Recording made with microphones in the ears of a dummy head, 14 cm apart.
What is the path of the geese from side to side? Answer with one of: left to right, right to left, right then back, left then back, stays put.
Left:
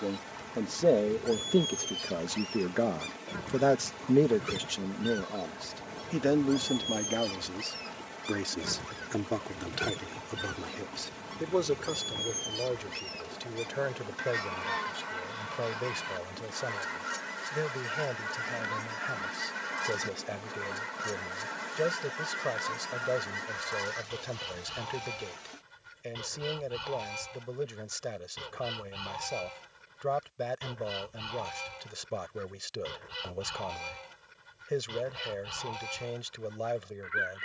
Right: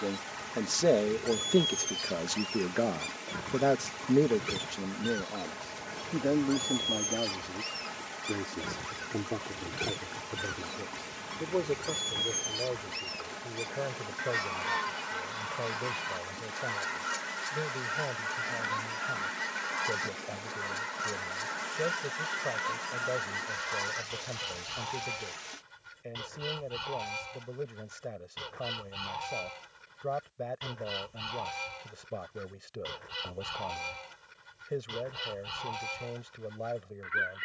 stays put.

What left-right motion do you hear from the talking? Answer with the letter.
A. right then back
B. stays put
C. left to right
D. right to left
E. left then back
D.